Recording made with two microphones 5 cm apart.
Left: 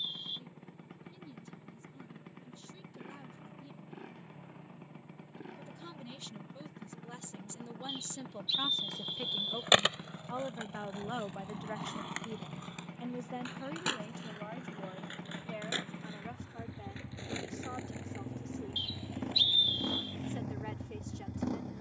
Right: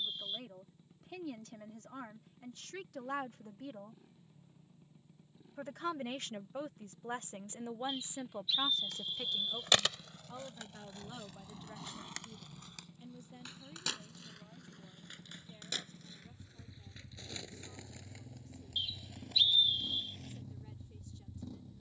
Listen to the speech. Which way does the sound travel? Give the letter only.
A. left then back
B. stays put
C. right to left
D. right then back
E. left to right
C.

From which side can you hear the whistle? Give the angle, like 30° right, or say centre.
centre.